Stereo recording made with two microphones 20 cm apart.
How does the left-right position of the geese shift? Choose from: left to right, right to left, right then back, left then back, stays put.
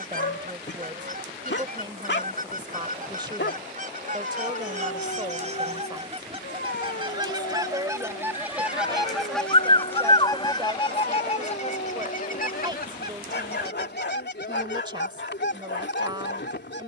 right to left.